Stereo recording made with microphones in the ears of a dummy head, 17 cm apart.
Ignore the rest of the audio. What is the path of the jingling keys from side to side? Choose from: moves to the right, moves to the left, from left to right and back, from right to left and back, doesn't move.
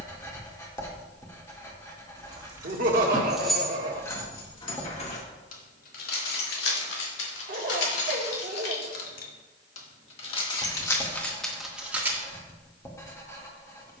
from right to left and back.